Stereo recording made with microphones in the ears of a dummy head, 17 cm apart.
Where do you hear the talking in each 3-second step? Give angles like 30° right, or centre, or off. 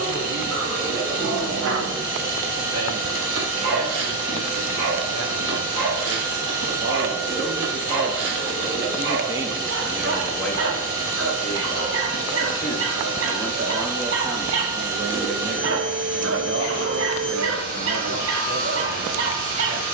80° right, 80° right, 50° right, centre, centre, 60° right, 80° right.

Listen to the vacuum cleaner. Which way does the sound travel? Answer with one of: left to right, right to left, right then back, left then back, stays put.
stays put.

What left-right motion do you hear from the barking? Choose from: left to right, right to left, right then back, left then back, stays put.
stays put.